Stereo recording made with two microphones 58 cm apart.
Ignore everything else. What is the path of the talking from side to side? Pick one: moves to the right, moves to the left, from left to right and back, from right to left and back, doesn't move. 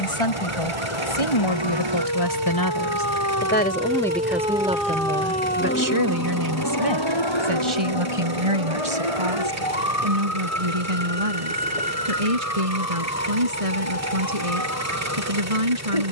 moves to the right.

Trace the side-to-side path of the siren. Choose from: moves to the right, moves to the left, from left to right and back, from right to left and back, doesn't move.
moves to the left.